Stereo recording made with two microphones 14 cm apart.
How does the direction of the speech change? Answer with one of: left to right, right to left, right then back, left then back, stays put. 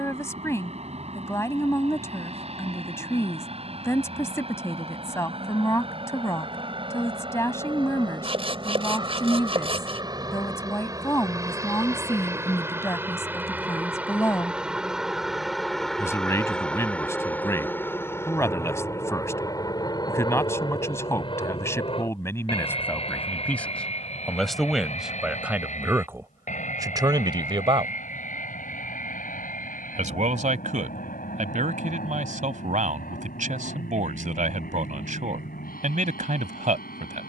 left to right.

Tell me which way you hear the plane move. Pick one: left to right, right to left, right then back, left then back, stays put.
right to left.